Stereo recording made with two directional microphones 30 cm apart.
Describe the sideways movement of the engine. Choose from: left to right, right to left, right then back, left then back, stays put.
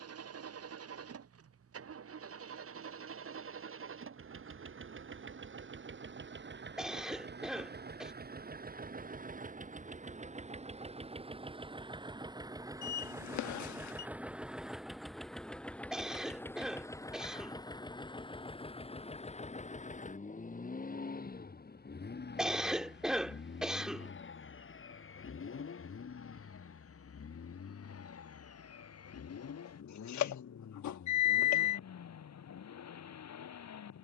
right to left.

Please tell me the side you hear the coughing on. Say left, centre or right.
centre.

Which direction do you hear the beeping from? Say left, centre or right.
left.